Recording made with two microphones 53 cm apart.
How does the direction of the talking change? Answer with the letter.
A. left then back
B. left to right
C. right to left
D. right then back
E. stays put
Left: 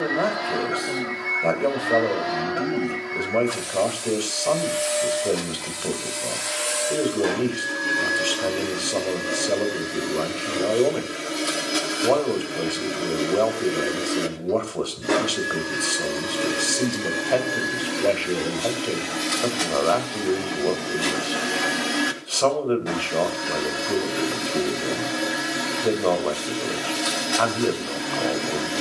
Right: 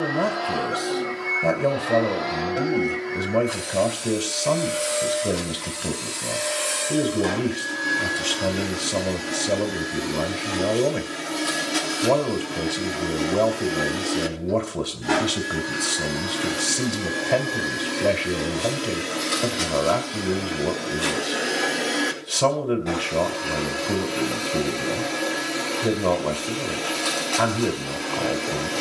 E.